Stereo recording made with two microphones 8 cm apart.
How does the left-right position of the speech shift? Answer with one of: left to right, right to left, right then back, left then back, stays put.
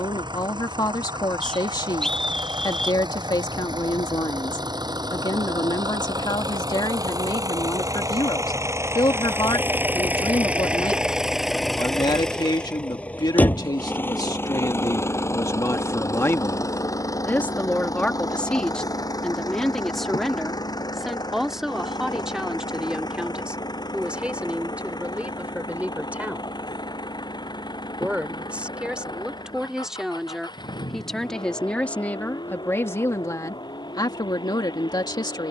right then back.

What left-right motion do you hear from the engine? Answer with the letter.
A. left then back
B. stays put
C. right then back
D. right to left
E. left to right
D.